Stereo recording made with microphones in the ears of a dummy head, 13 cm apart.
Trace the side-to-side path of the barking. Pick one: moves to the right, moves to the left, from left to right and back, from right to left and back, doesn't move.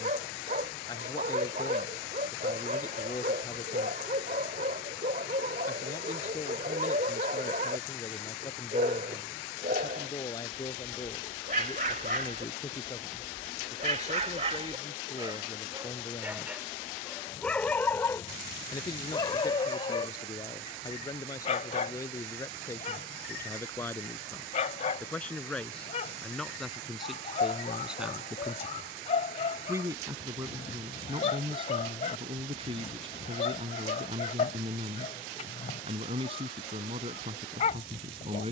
moves to the left.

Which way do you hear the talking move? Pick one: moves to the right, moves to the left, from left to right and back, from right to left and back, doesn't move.
moves to the right.